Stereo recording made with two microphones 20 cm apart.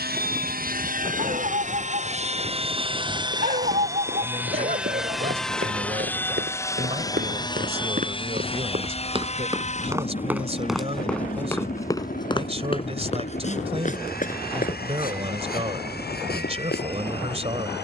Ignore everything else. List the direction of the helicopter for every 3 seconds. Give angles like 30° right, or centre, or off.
40° right, 10° right, 20° left, 40° left, 50° left, 50° left.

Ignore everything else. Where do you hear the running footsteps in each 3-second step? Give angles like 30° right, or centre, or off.
off, 70° right, 50° right, 10° right, 30° left, 50° left.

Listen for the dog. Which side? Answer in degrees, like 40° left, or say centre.
40° right.